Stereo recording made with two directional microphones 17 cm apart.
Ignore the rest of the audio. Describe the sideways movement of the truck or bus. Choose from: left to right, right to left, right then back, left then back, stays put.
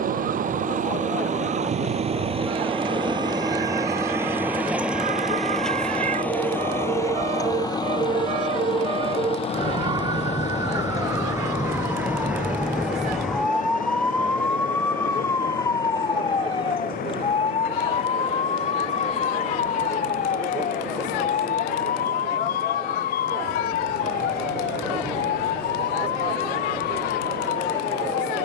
right to left.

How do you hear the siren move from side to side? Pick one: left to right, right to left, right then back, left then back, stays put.
right to left.